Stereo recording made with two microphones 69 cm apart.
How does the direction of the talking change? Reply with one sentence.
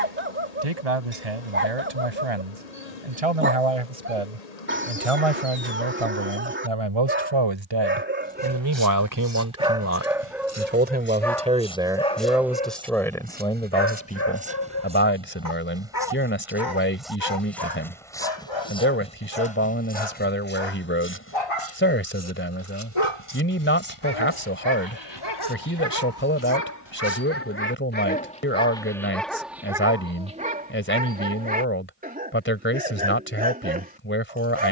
In this clip you hear the talking move from right to left.